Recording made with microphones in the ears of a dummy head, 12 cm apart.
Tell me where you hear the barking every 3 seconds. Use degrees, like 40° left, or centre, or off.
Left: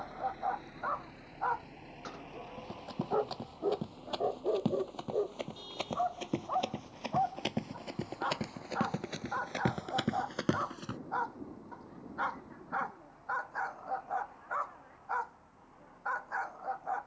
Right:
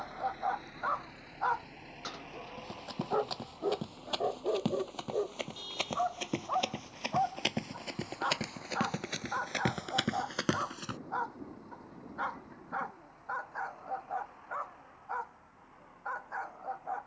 50° right, 40° right, 20° right, 10° right, 10° left, 20° left.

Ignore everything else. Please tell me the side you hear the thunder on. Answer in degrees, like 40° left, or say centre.
60° right.